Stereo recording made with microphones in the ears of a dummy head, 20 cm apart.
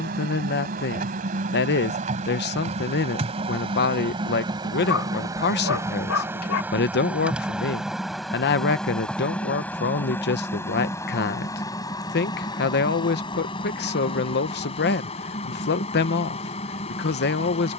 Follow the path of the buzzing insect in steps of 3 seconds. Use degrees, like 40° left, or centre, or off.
40° right, 20° right, centre, 10° left, 20° left, 30° left.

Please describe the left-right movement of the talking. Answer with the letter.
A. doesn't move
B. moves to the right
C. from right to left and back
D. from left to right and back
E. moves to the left
A.